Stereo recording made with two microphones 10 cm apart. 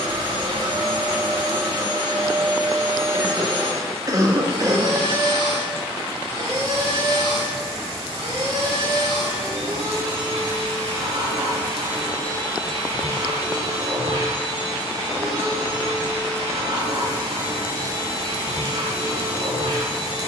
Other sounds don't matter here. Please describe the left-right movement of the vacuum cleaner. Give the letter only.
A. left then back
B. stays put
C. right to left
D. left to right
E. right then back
B.